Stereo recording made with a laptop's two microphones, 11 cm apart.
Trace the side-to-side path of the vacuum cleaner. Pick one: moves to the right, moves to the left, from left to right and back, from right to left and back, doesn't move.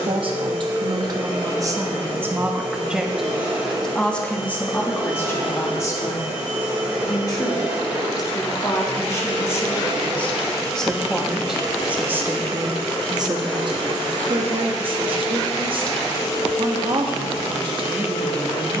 moves to the left.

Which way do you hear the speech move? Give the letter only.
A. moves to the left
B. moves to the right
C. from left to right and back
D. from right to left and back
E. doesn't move
D.